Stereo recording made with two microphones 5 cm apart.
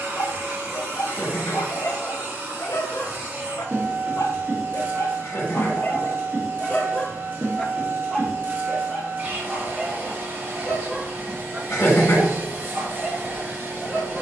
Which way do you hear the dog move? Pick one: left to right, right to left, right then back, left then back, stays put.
left to right.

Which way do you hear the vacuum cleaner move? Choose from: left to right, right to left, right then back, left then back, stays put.
stays put.